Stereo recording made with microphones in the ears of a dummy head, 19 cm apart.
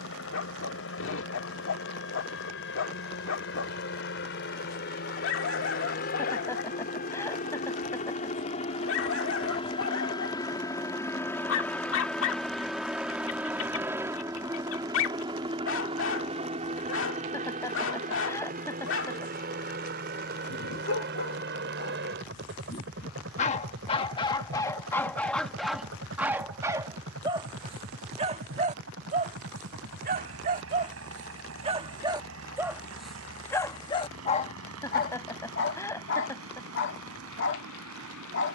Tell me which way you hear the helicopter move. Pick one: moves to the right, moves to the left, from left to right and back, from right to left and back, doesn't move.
moves to the right.